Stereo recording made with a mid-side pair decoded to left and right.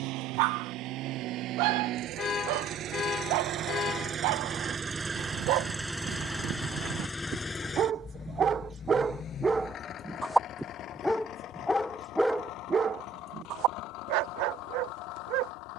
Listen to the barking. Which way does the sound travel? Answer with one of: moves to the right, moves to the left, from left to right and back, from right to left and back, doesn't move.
from right to left and back.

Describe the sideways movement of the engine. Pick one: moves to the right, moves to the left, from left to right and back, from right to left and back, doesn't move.
moves to the left.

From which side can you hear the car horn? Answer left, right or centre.
left.